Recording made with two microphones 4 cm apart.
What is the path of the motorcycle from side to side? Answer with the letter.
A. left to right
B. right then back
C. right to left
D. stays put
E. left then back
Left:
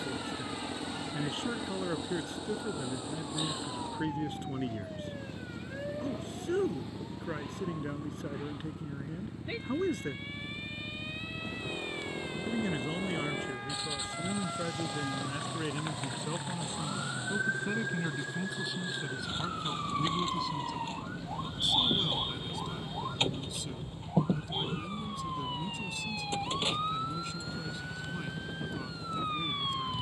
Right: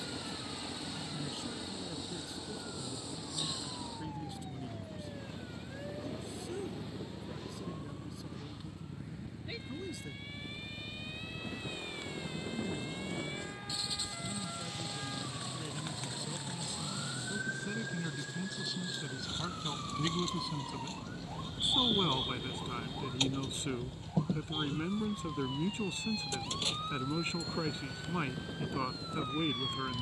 D.